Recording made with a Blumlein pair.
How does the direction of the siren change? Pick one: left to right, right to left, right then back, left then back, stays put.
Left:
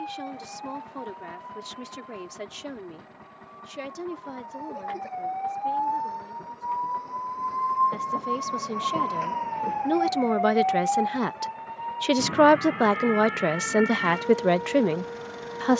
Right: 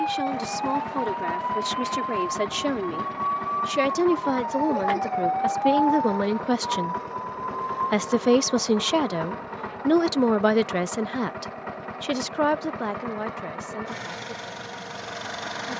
right to left.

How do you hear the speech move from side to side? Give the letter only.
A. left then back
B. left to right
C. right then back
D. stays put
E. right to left
E.